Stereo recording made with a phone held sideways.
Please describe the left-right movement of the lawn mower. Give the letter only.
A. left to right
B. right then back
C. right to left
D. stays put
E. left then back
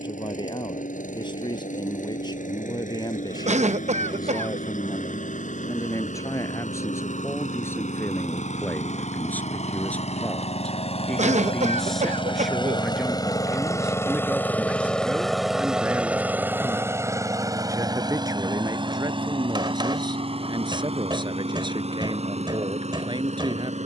A.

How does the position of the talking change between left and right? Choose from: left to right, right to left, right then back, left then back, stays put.
left to right.